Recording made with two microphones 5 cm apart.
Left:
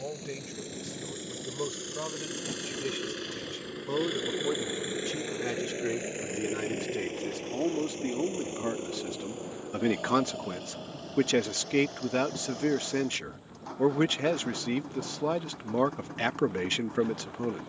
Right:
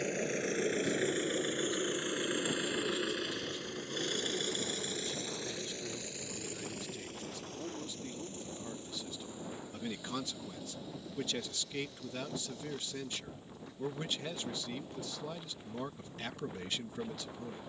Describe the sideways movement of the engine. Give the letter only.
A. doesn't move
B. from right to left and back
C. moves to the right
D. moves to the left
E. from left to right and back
D.